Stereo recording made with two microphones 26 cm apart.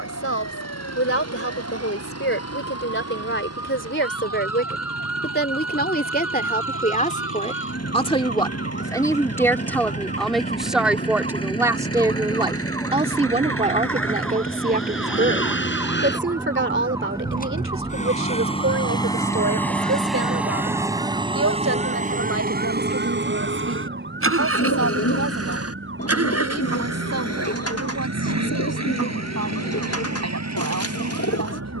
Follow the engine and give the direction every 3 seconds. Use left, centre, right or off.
left, left, left, left, left, left, centre, right, right, right, right.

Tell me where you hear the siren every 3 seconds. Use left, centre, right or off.
left, left, left, left, centre, centre, right, right, right, right, right.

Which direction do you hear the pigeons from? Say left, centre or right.
left.